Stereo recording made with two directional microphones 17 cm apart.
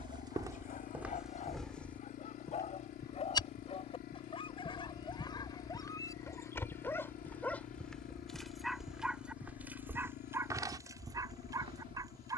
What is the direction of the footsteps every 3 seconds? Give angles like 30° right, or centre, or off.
10° right, 20° left, 10° left, 20° right.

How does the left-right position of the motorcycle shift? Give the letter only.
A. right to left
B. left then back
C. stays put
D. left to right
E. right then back
C.